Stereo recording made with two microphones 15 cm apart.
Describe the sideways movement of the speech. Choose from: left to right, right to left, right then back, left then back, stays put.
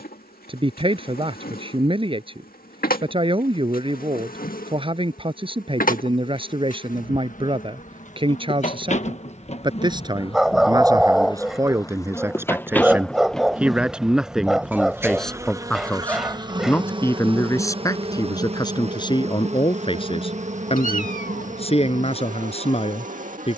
right to left.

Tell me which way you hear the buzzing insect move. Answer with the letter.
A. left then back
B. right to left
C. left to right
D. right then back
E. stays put
C.